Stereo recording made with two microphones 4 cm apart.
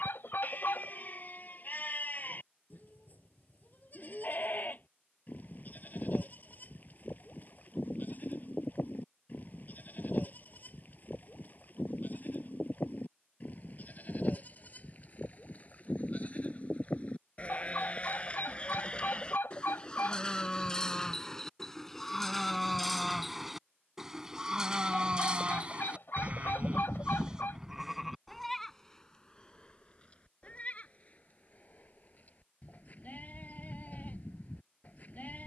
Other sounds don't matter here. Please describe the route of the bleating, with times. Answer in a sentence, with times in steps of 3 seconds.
You can hear the bleating on the left from 0 s, in the centre from 21 s, on the right from 24 s, in the centre from 27 s and on the left from 30 s.